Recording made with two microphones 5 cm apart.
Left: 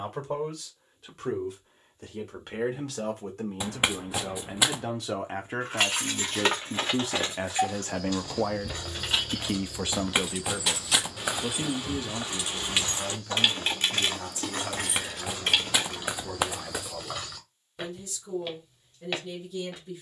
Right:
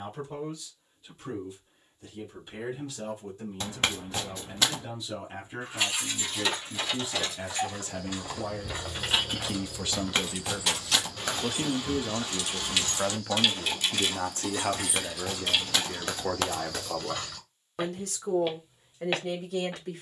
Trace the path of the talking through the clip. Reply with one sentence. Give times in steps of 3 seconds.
In this clip you hear the talking on the left from 0 s, in the centre from 9 s and on the right from 12 s.